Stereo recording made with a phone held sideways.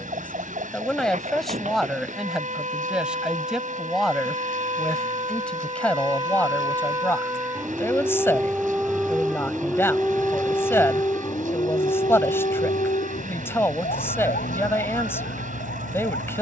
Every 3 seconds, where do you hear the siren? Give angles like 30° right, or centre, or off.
50° right, 40° right, 20° right, 10° left, 50° left, 70° left.